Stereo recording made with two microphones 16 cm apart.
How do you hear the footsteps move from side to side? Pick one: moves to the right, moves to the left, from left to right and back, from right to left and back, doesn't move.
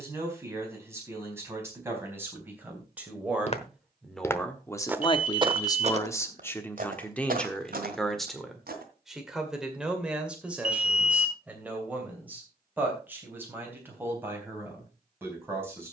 moves to the right.